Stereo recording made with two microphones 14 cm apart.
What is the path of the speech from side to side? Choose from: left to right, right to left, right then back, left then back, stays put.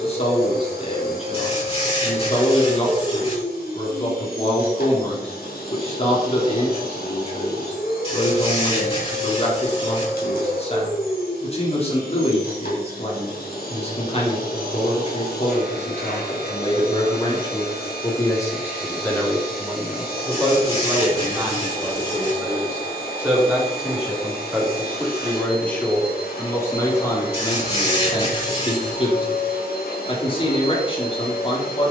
right then back.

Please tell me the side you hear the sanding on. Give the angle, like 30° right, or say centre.
40° left.